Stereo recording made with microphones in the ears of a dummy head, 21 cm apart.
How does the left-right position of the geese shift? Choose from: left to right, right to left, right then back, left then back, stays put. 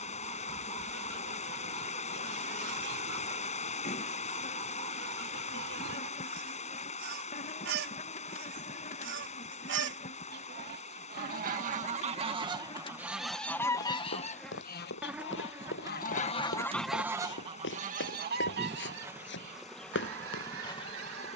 left then back.